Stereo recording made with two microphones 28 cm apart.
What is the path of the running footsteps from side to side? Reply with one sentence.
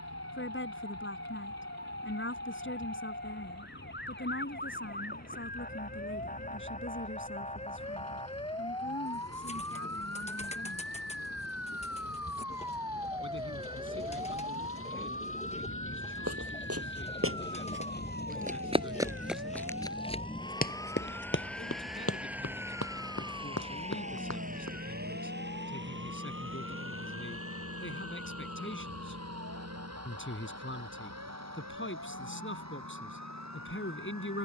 In this clip you hear the running footsteps move from right to left.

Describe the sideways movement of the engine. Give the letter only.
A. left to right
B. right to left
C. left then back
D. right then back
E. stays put
A.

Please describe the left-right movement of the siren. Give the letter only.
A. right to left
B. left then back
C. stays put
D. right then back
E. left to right
E.